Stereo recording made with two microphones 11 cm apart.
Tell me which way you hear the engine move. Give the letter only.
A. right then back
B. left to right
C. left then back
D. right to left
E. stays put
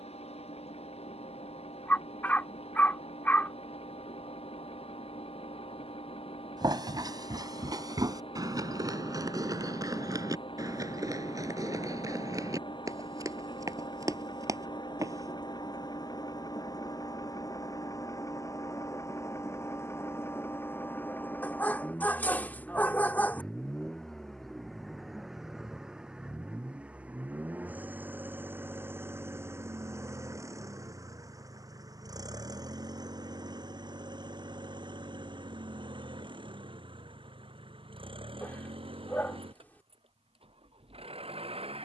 B.